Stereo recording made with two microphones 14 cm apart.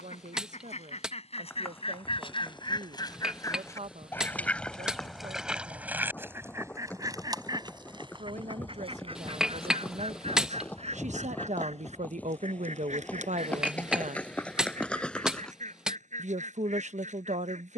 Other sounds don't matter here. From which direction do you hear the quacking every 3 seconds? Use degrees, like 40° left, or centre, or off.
50° left, 10° left, 30° right, 50° right, 60° right, 60° right.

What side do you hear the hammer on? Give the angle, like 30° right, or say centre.
10° right.